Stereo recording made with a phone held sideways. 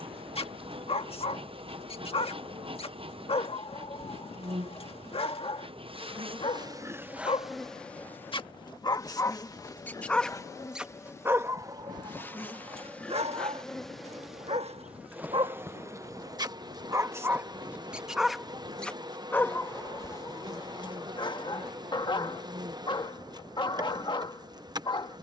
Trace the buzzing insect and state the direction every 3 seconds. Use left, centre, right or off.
right, right, centre, left, centre, right, right, right, right.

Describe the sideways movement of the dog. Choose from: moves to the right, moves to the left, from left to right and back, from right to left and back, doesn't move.
from left to right and back.